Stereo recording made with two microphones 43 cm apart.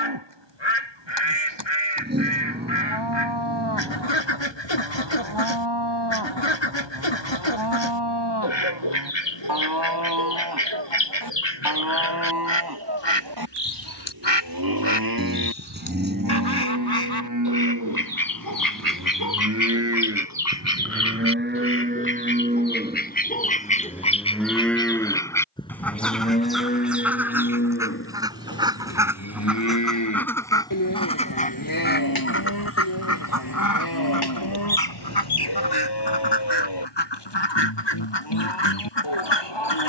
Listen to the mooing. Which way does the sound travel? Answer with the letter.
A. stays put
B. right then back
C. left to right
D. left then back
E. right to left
E.